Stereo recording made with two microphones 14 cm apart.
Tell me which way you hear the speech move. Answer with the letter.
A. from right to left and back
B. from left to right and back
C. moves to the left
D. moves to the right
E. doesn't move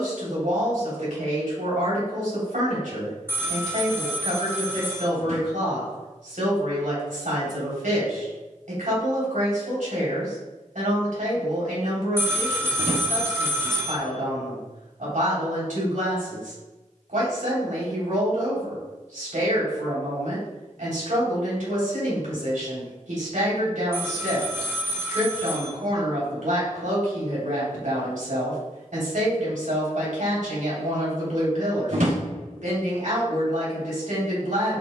E.